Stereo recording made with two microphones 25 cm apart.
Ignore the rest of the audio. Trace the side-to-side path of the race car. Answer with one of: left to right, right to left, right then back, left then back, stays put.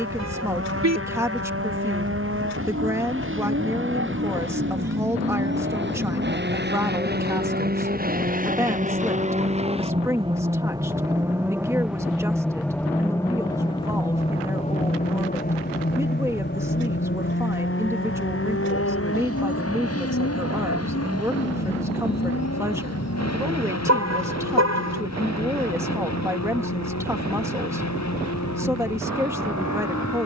right to left.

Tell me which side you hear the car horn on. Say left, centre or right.
right.